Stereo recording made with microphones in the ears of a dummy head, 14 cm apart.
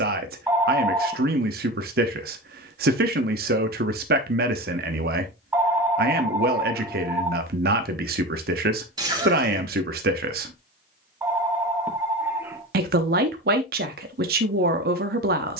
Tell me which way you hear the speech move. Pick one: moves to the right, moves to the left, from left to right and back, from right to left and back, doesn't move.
doesn't move.